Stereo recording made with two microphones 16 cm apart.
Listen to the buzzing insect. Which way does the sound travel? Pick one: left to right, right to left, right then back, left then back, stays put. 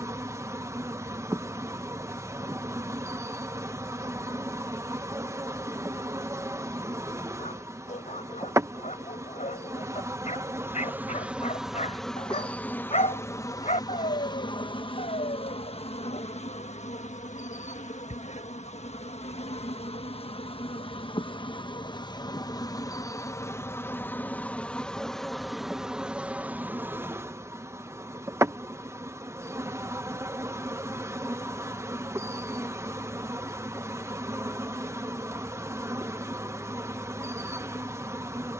left then back.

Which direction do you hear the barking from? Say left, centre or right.
left.